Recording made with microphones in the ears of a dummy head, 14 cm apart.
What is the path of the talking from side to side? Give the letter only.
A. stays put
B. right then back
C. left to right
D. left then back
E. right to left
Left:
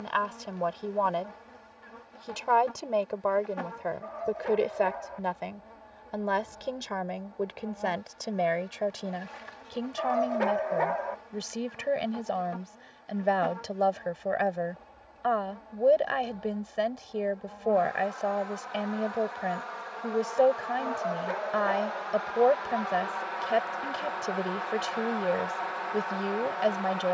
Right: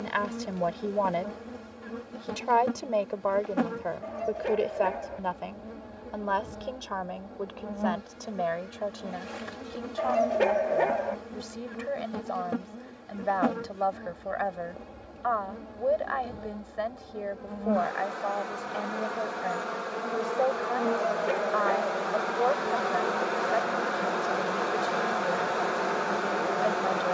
E.